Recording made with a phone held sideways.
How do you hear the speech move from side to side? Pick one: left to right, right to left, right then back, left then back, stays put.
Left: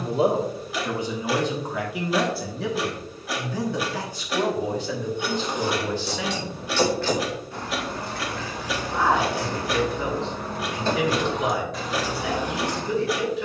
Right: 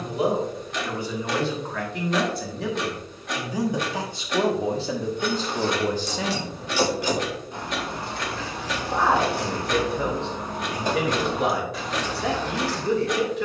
left to right.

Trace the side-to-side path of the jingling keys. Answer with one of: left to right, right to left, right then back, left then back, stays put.
right then back.